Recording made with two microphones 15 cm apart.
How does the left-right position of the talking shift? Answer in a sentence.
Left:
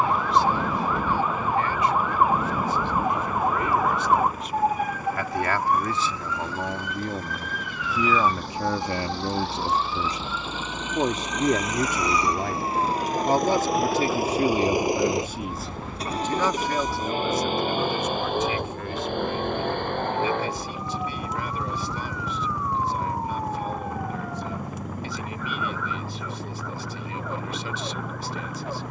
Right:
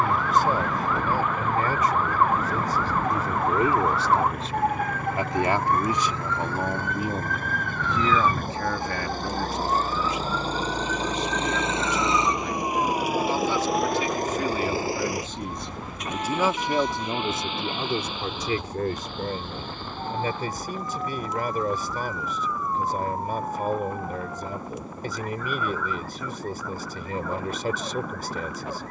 You can hear the talking go left and come back.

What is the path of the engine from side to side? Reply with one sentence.
You can hear the engine move from right to left.